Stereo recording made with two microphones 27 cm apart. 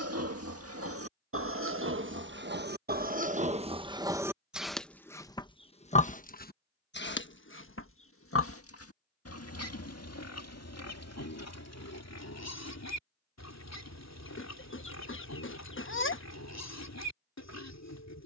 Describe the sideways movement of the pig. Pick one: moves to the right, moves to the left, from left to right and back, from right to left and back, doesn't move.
moves to the left.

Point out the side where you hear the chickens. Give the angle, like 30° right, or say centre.
50° left.